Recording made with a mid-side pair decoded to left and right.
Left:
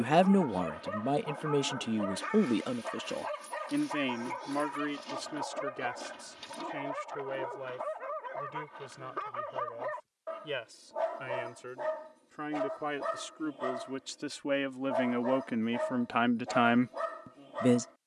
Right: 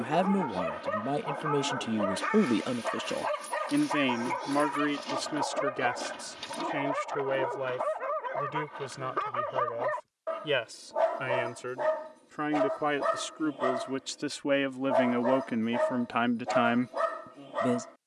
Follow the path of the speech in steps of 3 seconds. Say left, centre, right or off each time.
centre, right, right, right, right, centre.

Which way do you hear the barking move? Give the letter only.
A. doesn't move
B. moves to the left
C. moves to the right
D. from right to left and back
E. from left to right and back
A.